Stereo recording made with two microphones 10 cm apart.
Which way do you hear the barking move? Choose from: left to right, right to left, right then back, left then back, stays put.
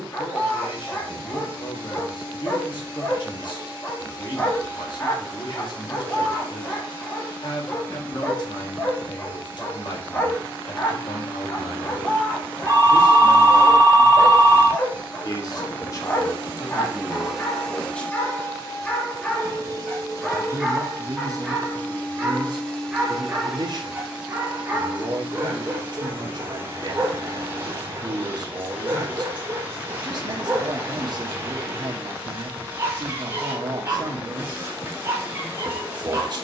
left to right.